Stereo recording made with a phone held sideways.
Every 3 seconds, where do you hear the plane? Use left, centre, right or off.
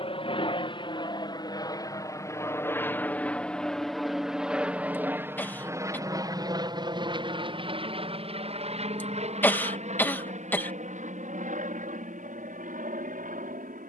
left, centre, right, right, right.